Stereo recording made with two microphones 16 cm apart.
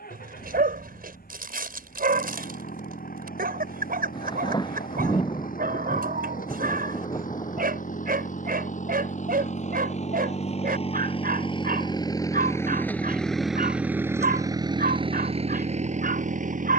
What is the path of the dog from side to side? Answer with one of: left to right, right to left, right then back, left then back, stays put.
stays put.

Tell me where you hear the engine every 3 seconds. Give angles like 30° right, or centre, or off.
70° left, 70° left, 60° left, 40° left, centre, 50° right.